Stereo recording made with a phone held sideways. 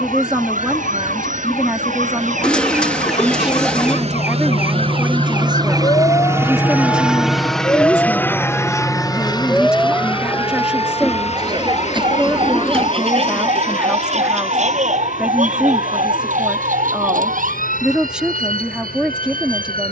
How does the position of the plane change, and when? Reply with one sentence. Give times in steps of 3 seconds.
In this clip you hear the plane on the right from 0 s, in the centre from 6 s and on the left from 9 s.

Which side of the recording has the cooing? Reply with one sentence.
In this clip you hear the cooing in the centre.